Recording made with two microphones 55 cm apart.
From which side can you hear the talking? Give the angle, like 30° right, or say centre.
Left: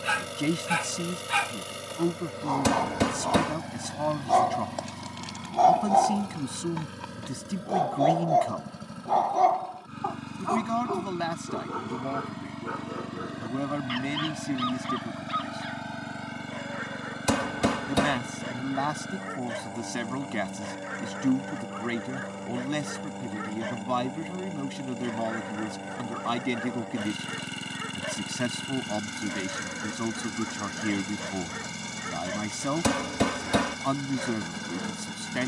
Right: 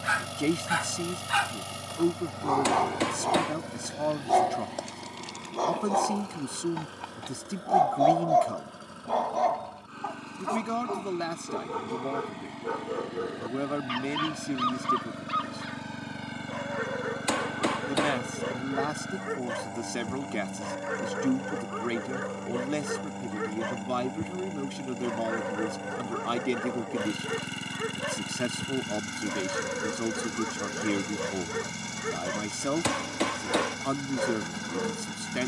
20° left.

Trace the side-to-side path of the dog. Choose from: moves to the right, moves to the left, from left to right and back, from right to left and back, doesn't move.
moves to the right.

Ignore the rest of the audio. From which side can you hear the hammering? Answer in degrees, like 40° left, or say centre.
60° left.